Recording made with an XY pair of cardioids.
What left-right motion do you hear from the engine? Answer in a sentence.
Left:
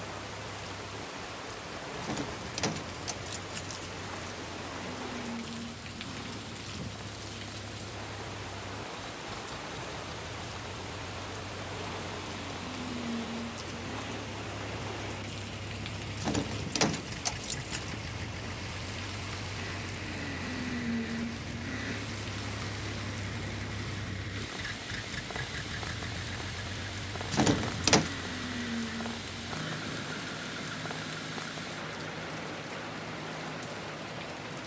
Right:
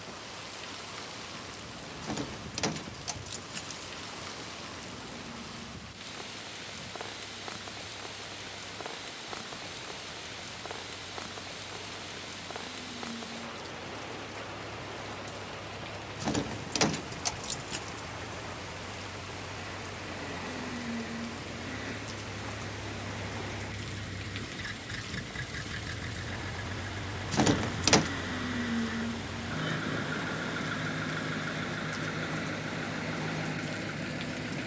In this clip you hear the engine move from left to right.